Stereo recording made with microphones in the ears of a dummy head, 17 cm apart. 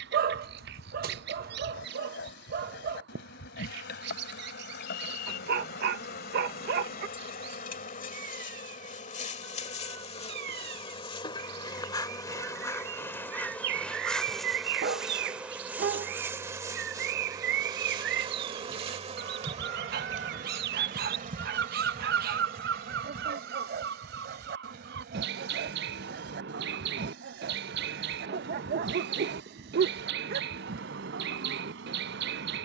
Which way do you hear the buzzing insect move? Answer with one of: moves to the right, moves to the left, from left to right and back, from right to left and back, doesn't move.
moves to the right.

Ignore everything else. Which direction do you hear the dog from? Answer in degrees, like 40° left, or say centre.
50° right.